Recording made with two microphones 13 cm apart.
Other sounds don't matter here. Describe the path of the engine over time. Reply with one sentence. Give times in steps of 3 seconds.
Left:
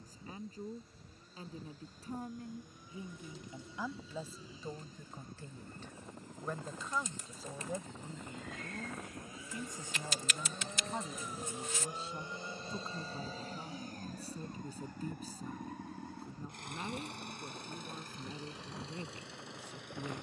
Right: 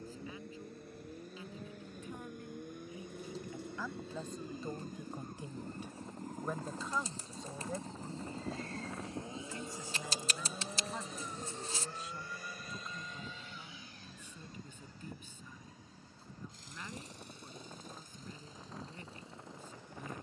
You can hear the engine on the right from 0 s, in the centre from 9 s and on the left from 12 s.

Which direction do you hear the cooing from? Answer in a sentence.
You can hear the cooing on the right.